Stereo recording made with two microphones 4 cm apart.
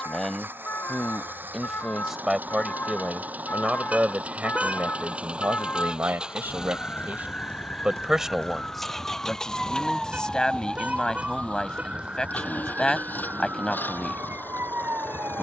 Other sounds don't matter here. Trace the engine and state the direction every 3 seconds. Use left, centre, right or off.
right, right, centre, left, left.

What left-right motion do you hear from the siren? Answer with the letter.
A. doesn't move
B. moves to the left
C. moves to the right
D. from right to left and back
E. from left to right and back
C.